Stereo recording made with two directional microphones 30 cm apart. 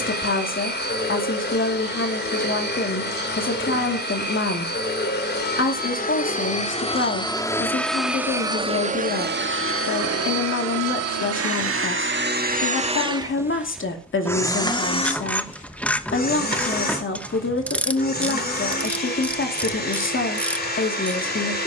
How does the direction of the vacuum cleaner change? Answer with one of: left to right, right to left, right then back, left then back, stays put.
right then back.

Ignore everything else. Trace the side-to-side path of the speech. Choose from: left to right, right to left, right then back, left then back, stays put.
stays put.